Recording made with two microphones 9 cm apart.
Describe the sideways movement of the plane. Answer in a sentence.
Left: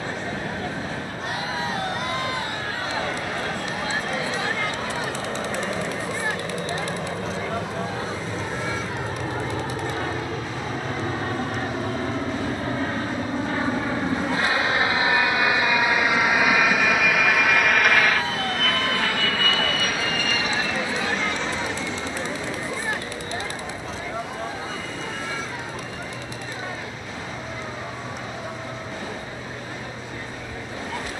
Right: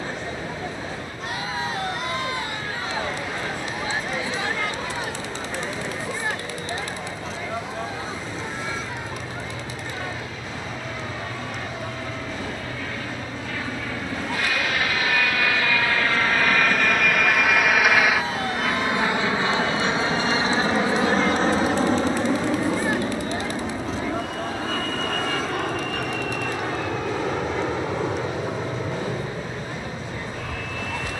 You can hear the plane move from left to right.